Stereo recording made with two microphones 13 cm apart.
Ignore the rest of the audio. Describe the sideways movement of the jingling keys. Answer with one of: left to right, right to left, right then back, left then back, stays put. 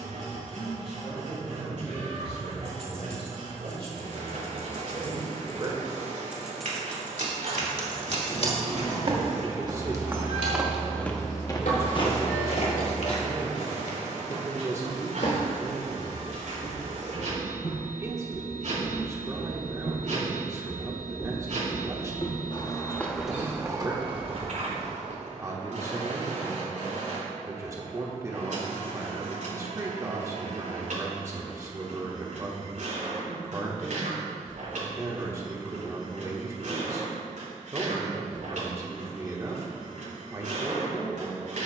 right to left.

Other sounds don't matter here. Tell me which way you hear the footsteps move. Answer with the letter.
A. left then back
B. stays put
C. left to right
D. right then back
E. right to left
A.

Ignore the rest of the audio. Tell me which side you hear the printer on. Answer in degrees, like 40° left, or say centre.
70° right.